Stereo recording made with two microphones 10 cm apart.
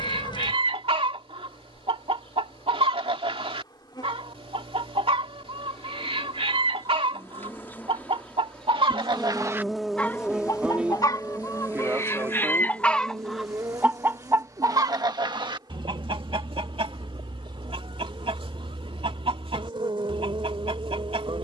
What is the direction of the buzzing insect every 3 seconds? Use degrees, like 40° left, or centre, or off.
60° left, 40° left, 20° left, 10° right, 40° right, 50° right, 60° right.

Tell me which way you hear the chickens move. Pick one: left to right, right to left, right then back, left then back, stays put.
left then back.